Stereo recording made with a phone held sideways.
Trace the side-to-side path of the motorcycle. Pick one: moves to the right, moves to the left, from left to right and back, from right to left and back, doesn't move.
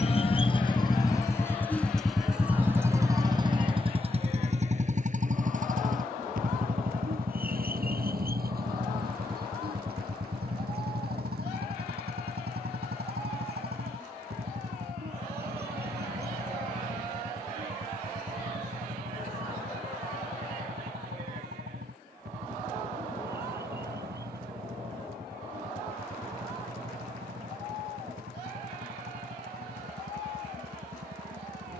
moves to the right.